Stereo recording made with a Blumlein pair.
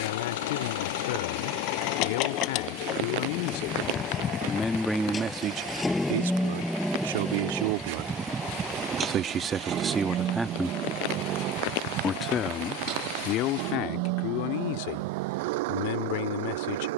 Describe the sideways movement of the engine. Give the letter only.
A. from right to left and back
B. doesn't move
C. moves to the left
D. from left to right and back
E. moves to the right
E.